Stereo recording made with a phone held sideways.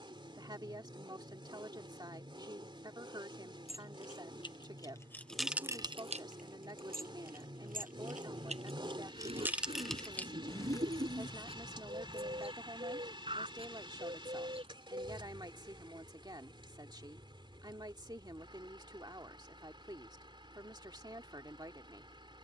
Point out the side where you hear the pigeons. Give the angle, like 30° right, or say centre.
40° right.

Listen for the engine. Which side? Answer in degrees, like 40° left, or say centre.
30° right.